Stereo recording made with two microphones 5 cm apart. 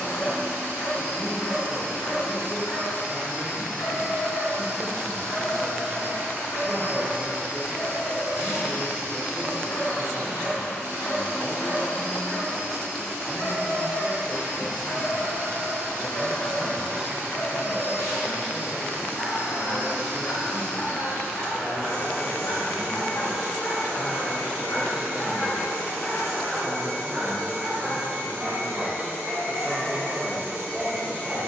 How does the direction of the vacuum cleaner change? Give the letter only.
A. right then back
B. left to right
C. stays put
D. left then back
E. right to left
C.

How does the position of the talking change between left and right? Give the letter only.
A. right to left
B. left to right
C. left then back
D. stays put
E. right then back
D.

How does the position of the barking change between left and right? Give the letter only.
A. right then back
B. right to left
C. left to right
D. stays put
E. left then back
C.